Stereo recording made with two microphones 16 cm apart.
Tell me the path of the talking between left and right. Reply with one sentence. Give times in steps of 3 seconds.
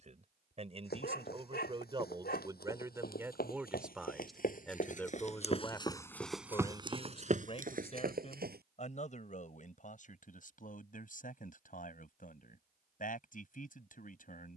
You can hear the talking on the right from 0 s, in the centre from 3 s and on the left from 6 s.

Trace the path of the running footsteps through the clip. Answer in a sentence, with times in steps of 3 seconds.
You can hear the running footsteps on the left from 0 s, on the right from 6 s and not at all from 9 s.